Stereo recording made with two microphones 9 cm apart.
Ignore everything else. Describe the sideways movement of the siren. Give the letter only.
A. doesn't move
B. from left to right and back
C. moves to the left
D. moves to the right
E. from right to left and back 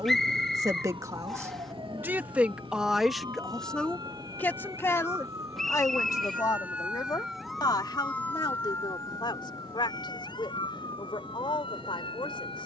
C.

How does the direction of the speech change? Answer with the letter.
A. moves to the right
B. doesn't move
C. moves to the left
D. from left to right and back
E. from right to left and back
C.